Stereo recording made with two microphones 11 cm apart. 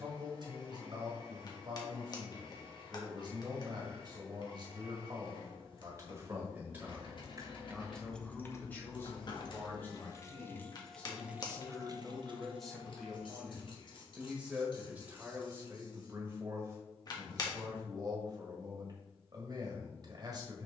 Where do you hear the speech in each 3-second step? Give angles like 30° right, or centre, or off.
40° right, 40° right, centre, 10° left, centre, 30° right, 40° right.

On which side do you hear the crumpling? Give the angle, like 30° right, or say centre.
40° left.